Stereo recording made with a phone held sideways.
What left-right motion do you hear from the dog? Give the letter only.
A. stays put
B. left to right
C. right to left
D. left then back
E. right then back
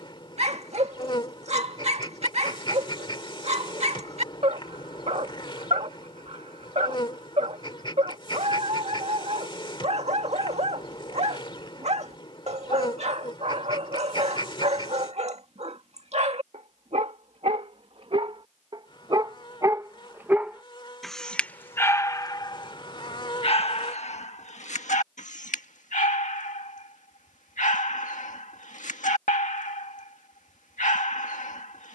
C.